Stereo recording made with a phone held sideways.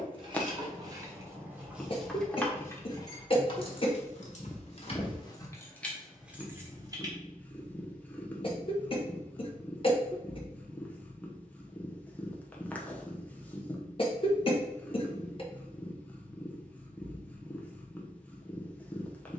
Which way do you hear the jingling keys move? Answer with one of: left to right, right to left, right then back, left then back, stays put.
left then back.